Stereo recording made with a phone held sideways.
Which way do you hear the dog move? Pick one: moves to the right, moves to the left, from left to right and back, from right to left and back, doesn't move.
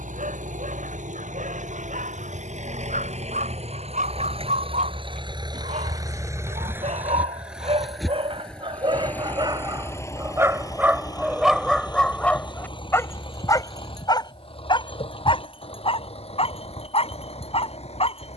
moves to the left.